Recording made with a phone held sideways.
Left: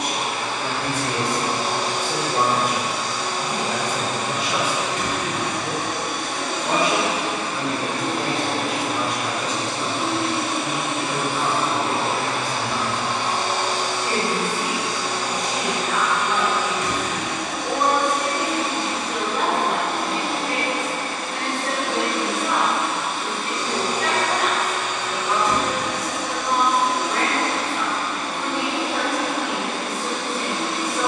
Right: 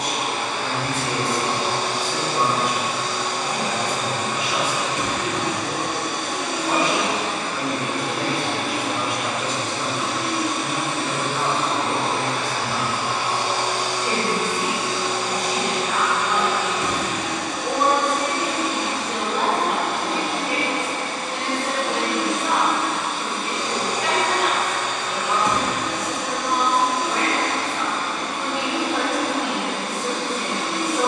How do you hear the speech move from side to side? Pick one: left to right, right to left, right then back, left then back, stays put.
left to right.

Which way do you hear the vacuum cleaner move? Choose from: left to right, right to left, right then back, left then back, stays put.
left then back.